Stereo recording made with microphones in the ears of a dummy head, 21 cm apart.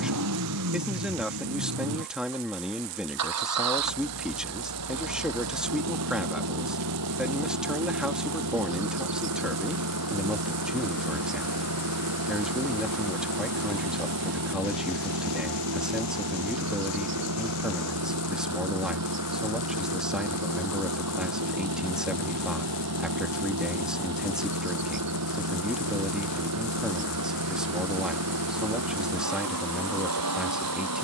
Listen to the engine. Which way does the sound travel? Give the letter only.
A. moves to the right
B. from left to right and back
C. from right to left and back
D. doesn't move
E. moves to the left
D.